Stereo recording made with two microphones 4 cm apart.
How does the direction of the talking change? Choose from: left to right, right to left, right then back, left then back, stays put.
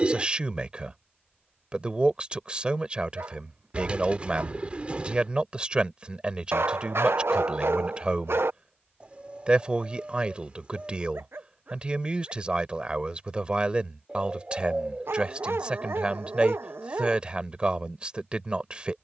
stays put.